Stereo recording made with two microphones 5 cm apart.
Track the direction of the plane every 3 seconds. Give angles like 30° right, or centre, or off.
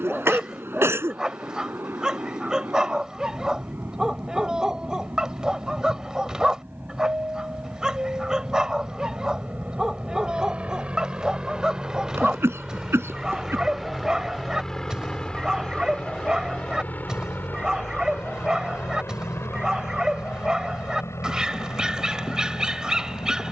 50° right, 50° right, 40° right, 30° right, centre, 30° left, 50° left, 70° left.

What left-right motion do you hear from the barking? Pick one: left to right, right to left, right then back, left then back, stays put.
stays put.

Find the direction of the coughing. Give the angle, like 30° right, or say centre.
60° right.